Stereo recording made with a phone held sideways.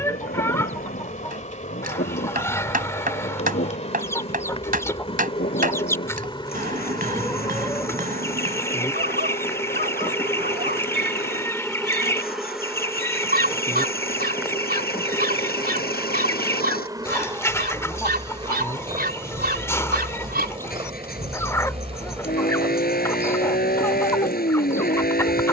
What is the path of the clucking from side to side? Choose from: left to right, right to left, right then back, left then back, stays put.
stays put.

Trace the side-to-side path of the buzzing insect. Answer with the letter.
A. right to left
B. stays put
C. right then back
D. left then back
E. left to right
E.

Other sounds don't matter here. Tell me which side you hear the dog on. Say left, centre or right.
right.